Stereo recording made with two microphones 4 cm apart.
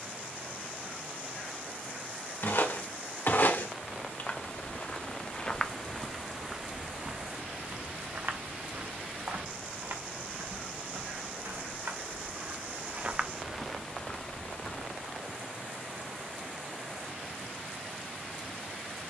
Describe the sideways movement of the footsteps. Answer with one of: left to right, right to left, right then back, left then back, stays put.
right then back.